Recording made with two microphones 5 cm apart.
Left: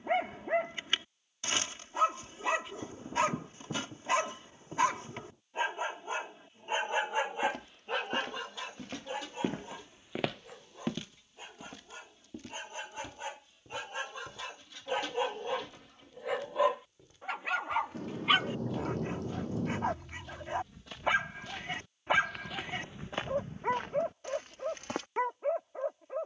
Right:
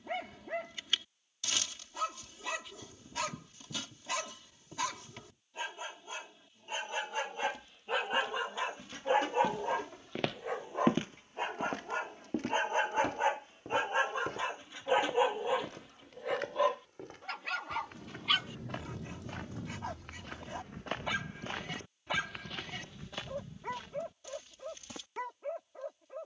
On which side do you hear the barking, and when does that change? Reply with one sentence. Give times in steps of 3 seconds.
In this clip you hear the barking on the left from 0 s, in the centre from 6 s, on the right from 9 s, in the centre from 15 s and on the left from 18 s.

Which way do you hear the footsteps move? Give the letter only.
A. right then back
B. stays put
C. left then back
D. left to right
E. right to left
A.